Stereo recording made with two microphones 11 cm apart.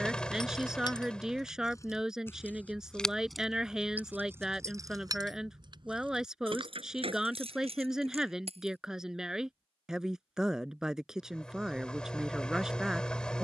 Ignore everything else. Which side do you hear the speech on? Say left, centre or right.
centre.